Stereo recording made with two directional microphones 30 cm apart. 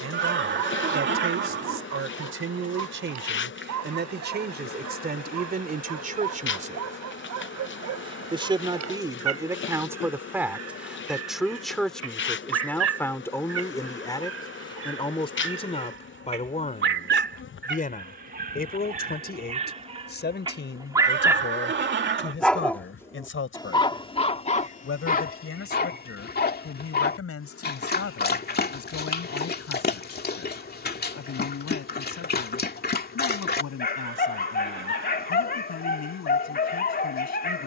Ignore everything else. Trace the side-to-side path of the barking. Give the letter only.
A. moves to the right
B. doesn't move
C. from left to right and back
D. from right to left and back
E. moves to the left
E.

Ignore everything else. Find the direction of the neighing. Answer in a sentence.
In this clip you hear the neighing on the right.